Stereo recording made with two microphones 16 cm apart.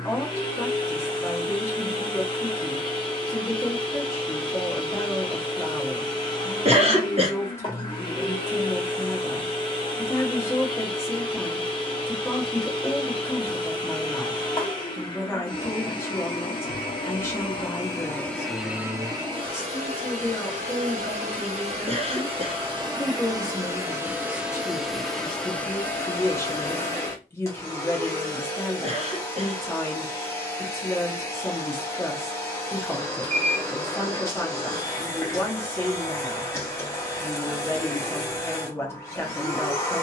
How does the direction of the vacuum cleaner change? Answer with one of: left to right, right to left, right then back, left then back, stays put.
right then back.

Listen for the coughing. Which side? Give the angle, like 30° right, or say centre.
40° right.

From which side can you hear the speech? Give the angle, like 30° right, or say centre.
10° left.